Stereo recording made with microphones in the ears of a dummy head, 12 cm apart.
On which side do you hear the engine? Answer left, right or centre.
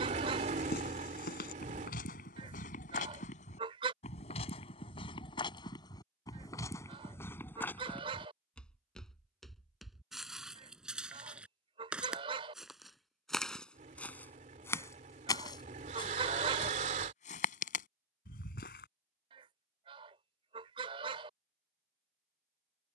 right.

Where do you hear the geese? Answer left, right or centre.
right.